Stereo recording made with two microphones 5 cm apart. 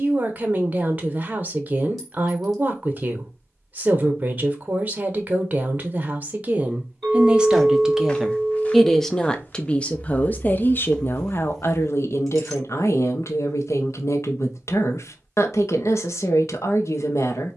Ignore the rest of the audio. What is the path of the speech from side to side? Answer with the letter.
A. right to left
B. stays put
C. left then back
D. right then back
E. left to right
A.